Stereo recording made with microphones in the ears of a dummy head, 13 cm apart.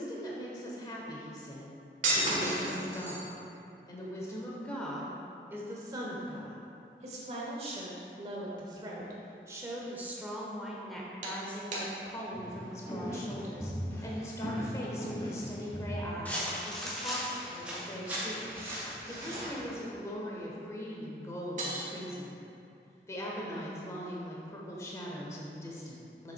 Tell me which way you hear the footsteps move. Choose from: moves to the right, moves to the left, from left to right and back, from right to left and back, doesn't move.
from right to left and back.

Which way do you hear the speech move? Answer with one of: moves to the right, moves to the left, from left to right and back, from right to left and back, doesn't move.
from left to right and back.